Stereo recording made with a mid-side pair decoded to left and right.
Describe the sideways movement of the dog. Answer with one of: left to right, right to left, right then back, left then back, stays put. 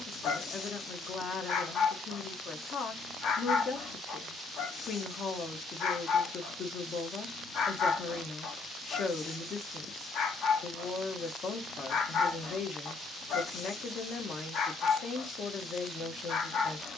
stays put.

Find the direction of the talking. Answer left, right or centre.
left.